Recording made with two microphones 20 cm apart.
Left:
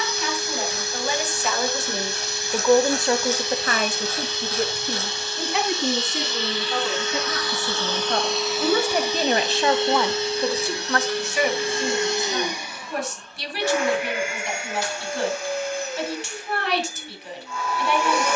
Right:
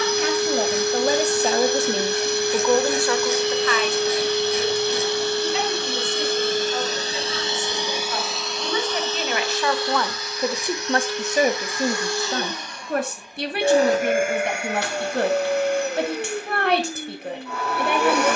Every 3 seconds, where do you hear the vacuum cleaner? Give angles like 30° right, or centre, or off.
60° right, 60° right, 20° right, 30° left, 20° right, 60° right.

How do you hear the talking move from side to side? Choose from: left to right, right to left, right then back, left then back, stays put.
left then back.